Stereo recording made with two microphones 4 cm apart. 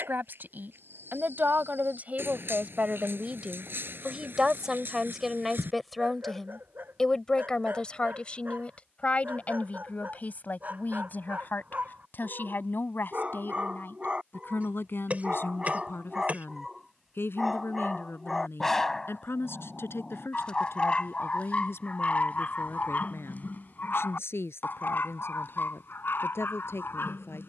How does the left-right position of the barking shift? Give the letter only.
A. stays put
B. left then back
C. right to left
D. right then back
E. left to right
C.